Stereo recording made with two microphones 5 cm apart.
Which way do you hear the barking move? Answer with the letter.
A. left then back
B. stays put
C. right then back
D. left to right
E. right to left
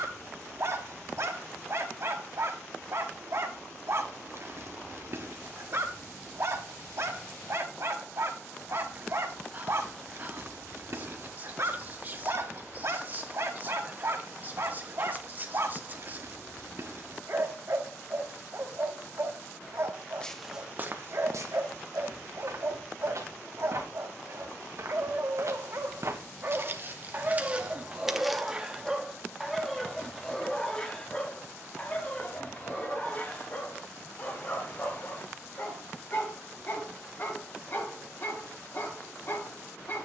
E.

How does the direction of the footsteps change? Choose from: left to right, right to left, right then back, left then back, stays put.
right then back.